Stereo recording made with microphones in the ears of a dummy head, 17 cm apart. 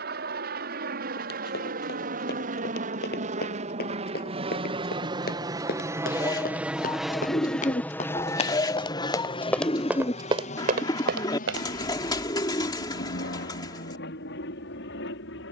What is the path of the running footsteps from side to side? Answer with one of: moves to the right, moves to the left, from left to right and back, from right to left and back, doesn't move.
moves to the right.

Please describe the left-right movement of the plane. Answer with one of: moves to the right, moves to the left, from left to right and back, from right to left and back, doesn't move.
moves to the left.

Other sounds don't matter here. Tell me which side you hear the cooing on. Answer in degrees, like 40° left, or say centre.
20° left.